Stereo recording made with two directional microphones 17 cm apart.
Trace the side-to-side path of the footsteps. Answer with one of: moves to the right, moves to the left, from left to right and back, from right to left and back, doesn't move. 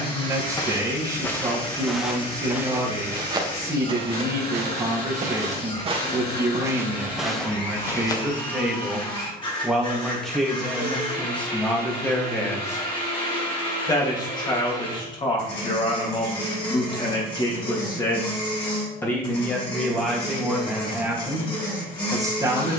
from left to right and back.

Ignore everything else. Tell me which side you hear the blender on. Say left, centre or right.
left.